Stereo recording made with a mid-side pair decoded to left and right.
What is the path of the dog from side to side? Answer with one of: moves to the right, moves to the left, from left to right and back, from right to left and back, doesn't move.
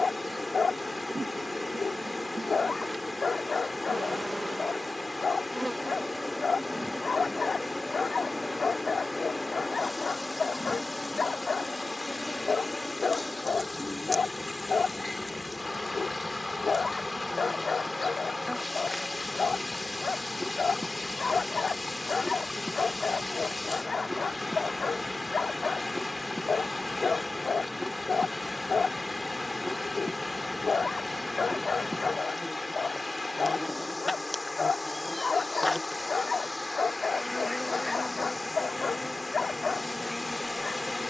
doesn't move.